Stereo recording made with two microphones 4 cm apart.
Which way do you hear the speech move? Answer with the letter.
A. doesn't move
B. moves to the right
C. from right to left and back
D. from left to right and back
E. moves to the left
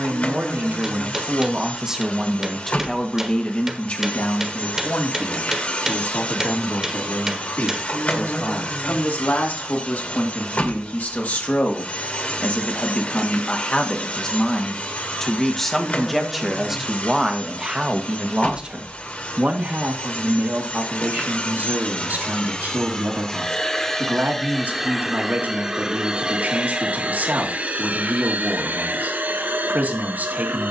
C.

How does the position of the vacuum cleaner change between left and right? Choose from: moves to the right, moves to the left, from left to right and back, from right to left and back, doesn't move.
moves to the right.